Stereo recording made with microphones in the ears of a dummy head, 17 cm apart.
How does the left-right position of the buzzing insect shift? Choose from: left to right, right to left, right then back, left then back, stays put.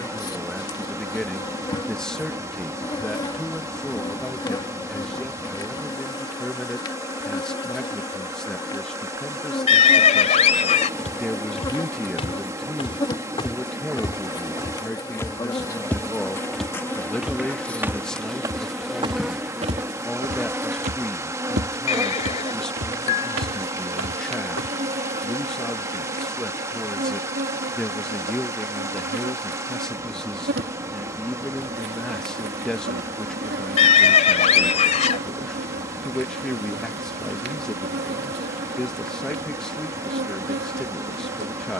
left to right.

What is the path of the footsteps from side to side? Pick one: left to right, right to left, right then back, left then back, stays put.
left to right.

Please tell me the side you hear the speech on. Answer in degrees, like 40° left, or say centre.
centre.